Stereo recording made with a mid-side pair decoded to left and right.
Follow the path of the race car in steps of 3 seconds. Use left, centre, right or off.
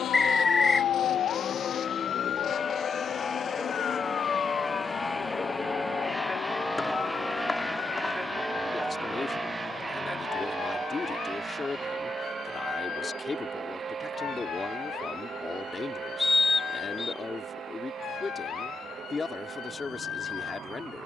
left, left, centre, right, right, right, right.